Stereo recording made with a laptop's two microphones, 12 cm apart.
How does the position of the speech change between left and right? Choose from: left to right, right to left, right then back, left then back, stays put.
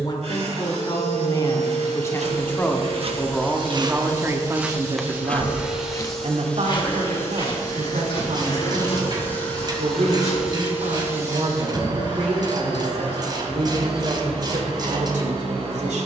left to right.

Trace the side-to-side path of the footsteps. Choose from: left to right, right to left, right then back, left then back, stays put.
right to left.